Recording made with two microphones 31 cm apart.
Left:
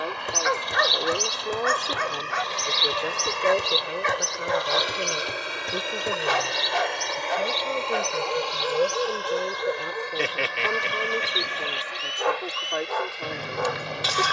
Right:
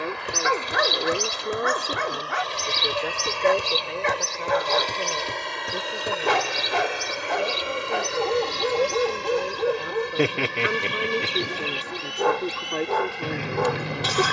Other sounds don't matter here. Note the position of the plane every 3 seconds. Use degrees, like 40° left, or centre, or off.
40° left, 20° left, 10° right, 40° right, 50° right.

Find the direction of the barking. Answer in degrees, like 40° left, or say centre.
60° right.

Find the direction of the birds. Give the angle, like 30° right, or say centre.
30° right.